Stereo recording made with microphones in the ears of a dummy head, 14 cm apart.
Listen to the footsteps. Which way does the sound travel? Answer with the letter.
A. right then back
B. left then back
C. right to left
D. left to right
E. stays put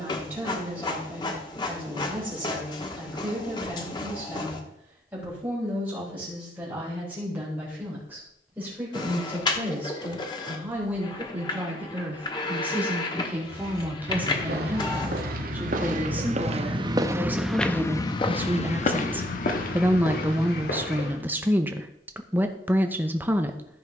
C.